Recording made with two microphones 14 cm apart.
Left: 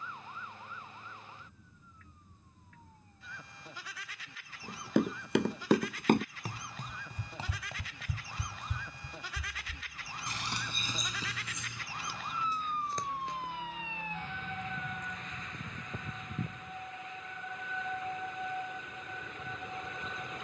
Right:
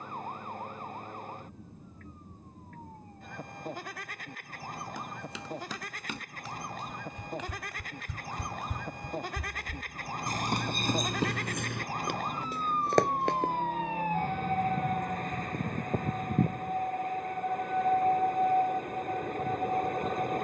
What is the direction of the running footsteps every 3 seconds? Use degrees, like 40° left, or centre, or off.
off, 60° left, 30° left, 50° right, 70° right, off, off.